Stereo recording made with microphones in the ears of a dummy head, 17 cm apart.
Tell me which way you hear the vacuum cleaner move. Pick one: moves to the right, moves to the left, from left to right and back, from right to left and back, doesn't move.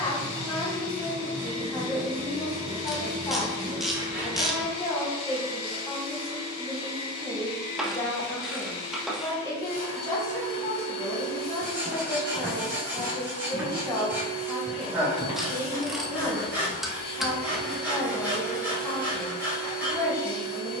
doesn't move.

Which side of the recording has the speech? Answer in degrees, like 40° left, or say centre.
20° left.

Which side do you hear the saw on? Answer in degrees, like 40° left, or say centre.
10° right.